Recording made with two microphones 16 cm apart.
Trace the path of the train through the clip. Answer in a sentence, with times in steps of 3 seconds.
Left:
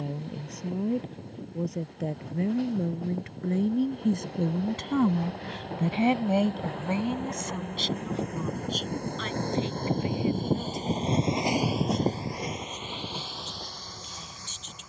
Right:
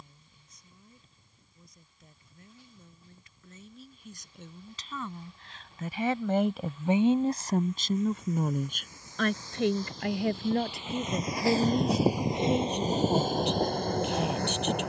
You can hear the train on the left from 0 s and on the right from 12 s.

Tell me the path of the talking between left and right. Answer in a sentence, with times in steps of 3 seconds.
In this clip you hear the talking on the left from 0 s and on the right from 6 s.